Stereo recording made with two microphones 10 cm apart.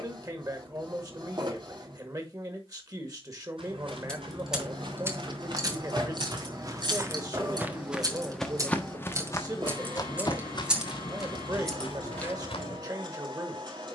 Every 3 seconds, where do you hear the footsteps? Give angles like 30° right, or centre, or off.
off, 60° right, 20° right, 50° left, 70° left.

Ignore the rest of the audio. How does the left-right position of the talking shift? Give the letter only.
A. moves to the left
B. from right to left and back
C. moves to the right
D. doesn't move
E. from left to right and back
D.